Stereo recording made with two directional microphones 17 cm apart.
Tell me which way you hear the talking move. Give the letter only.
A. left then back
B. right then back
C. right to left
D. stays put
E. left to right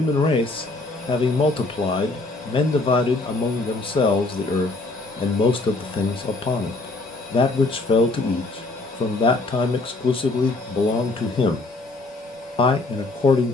D.